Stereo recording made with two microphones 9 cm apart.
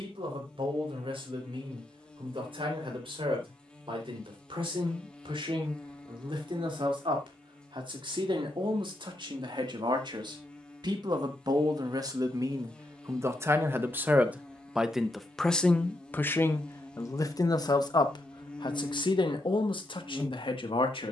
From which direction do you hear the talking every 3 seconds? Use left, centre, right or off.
right, right, right, right, right, left, left.